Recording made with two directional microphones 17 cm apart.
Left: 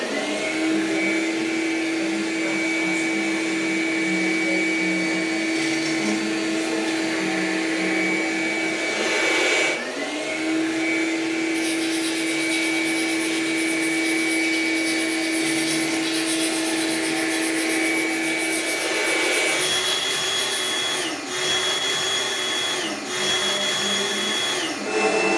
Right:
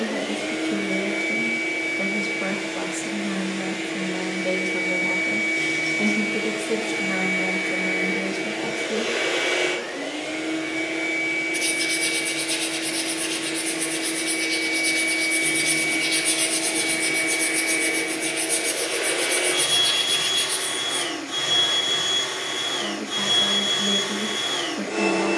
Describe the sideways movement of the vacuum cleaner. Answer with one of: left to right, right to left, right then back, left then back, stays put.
stays put.